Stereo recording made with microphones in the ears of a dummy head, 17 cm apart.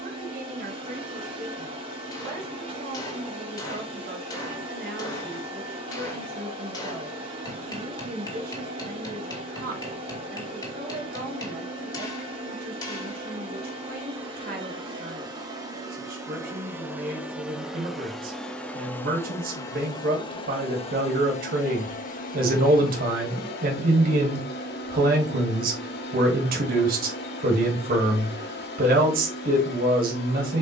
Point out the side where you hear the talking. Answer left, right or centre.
right.